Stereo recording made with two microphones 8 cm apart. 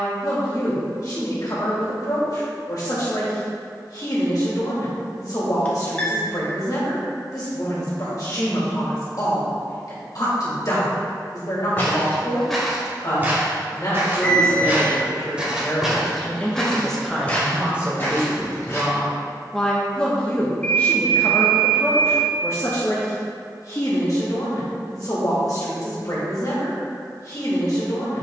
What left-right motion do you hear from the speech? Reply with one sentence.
In this clip you hear the speech go right and come back.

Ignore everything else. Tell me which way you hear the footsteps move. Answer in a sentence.
In this clip you hear the footsteps go right and come back.